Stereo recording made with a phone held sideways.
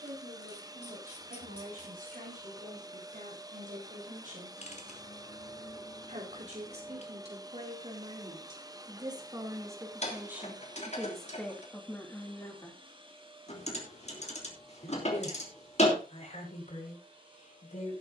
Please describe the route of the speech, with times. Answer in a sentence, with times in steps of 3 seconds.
You can hear the speech on the right from 0 s, in the centre from 9 s and on the left from 12 s.